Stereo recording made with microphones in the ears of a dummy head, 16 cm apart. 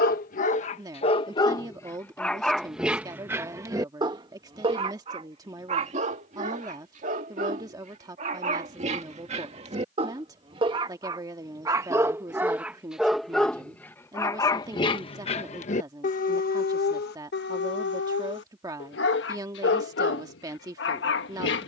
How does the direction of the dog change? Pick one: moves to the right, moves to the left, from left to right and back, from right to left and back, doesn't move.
from left to right and back.